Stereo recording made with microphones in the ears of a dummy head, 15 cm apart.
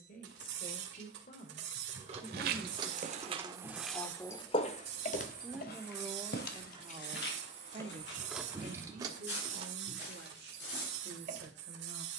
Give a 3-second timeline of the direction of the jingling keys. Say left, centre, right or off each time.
right, left, left, right.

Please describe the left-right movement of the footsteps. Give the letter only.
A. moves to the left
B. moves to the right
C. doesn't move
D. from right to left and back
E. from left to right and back
A.